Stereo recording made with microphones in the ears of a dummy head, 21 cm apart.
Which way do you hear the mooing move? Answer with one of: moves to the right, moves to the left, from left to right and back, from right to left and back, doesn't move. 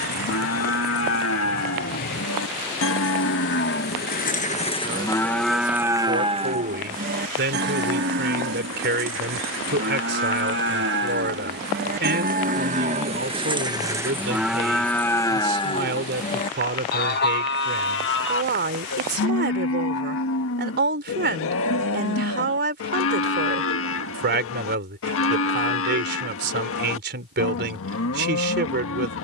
from left to right and back.